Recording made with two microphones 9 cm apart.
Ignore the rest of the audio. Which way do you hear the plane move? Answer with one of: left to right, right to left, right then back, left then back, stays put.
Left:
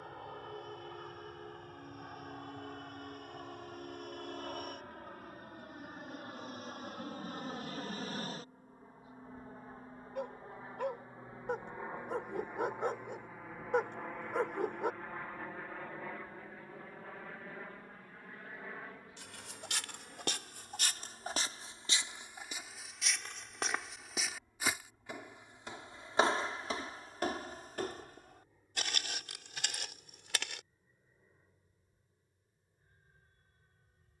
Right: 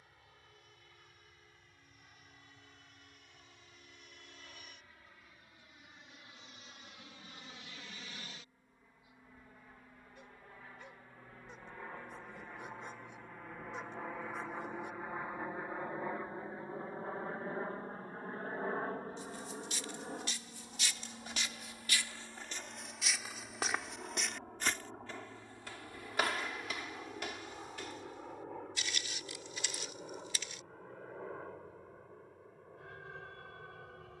left to right.